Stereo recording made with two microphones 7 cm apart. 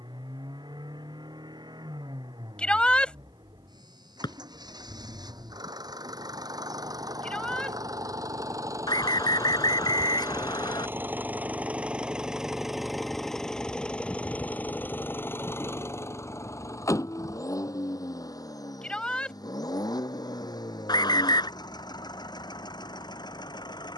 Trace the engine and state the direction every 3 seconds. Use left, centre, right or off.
right, right, right, right, centre, left, left, left.